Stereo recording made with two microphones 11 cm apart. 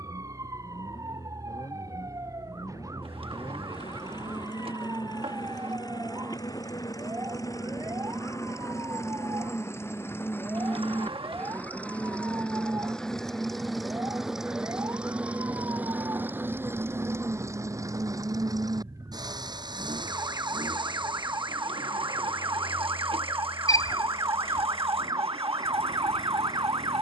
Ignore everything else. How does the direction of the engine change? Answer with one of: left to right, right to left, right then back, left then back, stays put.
left to right.